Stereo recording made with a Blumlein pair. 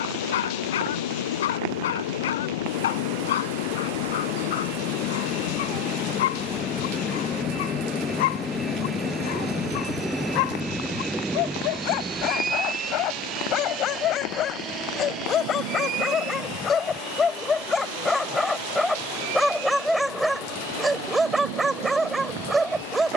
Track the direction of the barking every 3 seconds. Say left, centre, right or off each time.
left, left, left, left, left, left, centre, centre.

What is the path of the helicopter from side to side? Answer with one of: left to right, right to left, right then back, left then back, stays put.
left to right.